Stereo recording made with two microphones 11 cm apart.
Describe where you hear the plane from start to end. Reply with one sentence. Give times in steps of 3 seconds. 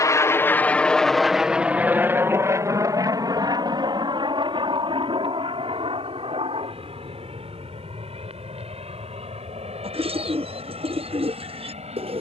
You can hear the plane in the centre from 0 s and on the right from 3 s.